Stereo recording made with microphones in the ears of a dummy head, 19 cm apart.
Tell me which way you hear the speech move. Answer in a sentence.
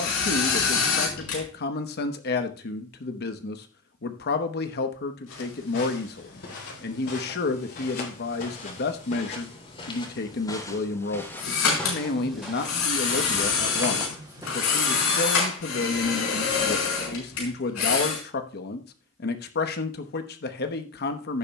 In this clip you hear the speech stay in one place.